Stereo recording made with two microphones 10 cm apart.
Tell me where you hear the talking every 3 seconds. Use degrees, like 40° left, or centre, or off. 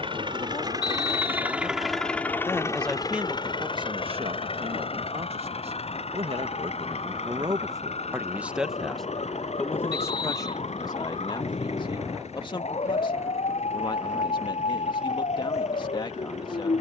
40° left, 50° right, 30° right, 30° left, 40° left, 40° left.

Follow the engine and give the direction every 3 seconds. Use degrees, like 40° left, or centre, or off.
10° right, 60° left, 70° left, 80° left, 80° left, 80° left.